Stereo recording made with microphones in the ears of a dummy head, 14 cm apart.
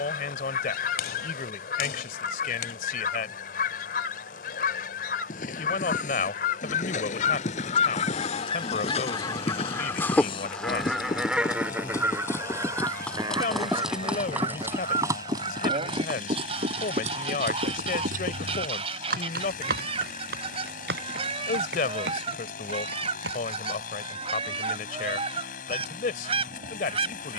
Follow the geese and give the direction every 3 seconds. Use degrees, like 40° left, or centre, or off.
70° left, 70° left, 50° left, 10° left, 30° right, 40° right, 40° right, 40° right, 40° right.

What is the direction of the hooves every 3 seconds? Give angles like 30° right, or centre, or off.
off, 50° left, 50° left, 30° left, centre, 40° right, 60° right, 70° right, off.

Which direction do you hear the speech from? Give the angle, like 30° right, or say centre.
60° left.